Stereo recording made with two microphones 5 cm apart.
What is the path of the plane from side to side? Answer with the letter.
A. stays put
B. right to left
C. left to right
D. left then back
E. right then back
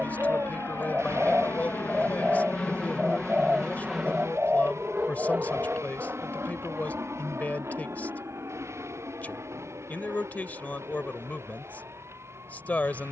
C.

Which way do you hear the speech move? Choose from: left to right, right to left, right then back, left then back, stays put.
stays put.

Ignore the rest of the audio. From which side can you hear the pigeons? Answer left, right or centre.
right.